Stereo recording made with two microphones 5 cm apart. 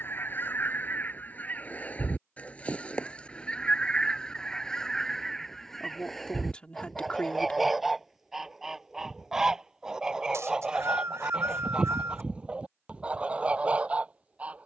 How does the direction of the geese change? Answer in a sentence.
You can hear the geese move to the right.